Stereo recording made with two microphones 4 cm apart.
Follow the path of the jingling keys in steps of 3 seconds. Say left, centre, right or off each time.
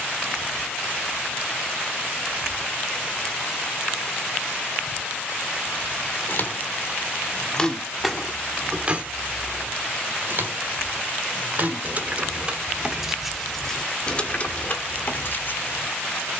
off, off, centre, right, centre, left.